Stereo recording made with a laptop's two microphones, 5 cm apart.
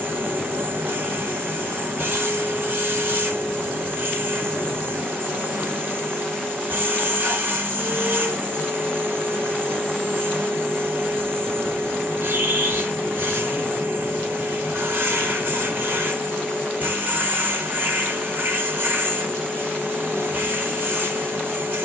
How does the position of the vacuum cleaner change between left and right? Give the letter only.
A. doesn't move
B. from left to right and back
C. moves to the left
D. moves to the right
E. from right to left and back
A.